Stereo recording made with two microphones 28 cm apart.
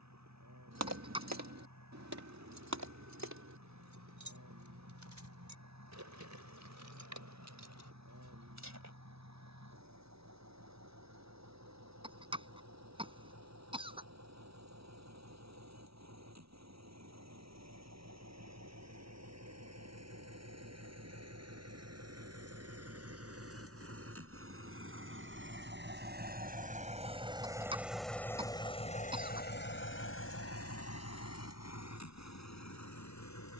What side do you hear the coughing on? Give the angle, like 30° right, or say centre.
20° right.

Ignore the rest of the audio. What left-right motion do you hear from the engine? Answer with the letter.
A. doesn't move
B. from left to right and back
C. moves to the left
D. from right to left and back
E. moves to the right
C.